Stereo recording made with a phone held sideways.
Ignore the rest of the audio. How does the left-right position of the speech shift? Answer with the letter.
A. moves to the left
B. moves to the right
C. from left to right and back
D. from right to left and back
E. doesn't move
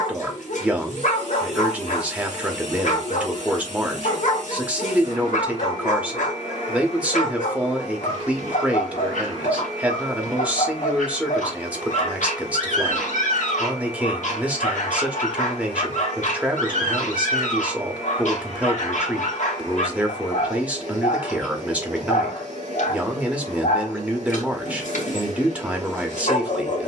E.